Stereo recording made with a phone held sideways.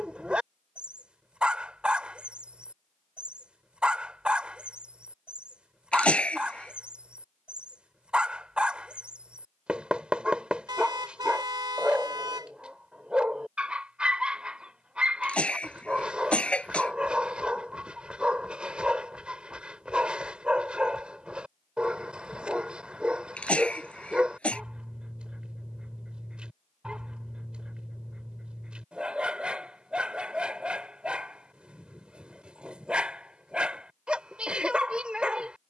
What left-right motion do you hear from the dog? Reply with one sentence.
In this clip you hear the dog stay put.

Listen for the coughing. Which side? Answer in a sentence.
You can hear the coughing in the centre.